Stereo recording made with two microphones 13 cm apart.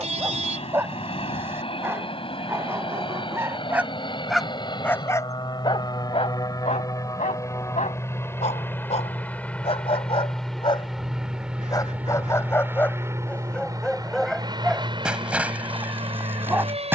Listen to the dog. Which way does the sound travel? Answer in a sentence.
In this clip you hear the dog move from right to left and back again.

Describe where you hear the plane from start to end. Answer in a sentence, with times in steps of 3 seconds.
You can hear the plane on the left from 0 s, in the centre from 9 s and on the right from 12 s.